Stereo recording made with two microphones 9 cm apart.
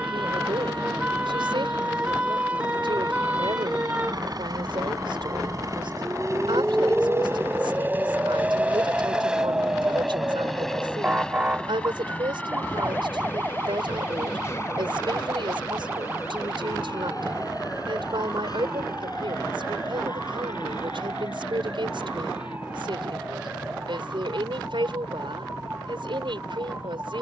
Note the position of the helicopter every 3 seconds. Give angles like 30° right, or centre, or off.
60° right, 50° right, 20° right, centre, 20° left, 40° left, 50° left, 50° left, 60° left.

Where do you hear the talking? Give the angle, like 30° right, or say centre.
70° right.